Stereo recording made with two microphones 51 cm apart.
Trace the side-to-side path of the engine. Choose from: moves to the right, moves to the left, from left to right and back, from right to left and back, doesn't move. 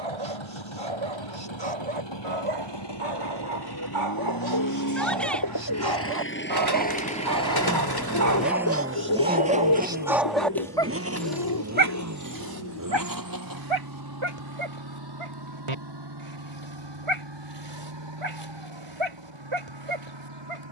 moves to the right.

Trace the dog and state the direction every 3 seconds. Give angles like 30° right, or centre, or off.
80° right, 70° right, 40° right, 10° right, 60° right, 80° right, 80° right.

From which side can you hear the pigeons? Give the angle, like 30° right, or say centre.
50° left.